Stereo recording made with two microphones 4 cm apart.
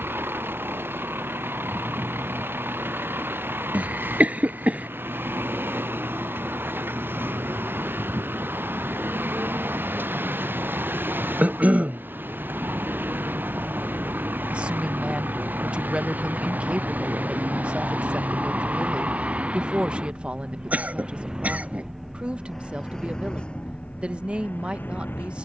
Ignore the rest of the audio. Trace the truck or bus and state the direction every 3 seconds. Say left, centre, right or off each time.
right, right, right, right, right, right, right, centre, left.